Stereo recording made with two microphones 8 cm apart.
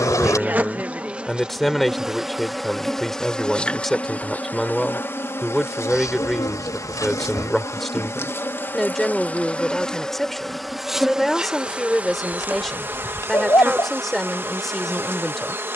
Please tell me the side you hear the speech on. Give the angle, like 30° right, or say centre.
centre.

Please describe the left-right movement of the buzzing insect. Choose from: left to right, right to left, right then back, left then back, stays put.
left then back.